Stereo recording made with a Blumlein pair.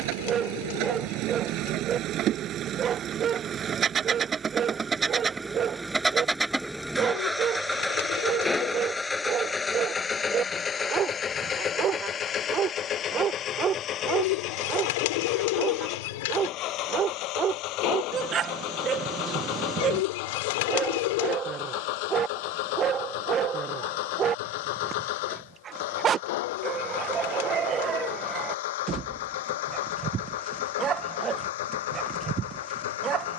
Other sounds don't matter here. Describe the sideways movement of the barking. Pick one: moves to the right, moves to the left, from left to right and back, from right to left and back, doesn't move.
doesn't move.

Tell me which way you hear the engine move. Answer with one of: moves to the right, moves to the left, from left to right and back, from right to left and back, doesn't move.
moves to the left.